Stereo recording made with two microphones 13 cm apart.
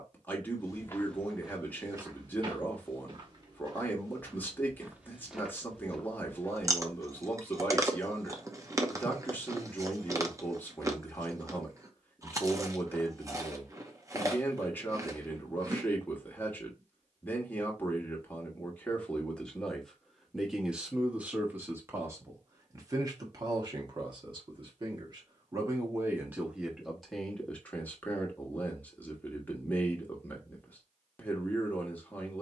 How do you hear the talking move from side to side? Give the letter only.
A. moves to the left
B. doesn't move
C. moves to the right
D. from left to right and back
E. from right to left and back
D.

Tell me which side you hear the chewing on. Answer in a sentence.
In this clip you hear the chewing on the right.